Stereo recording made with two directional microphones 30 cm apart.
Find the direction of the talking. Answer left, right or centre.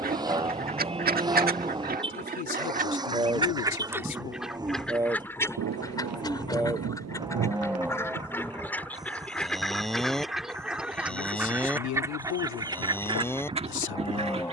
left.